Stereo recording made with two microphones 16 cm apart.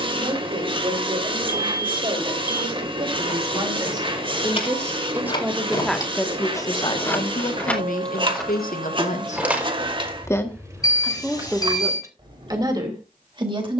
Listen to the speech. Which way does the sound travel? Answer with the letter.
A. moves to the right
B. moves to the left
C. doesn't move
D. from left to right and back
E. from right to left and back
E.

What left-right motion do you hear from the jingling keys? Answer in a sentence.
You can hear the jingling keys move to the right.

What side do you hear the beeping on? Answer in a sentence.
You can hear the beeping on the left.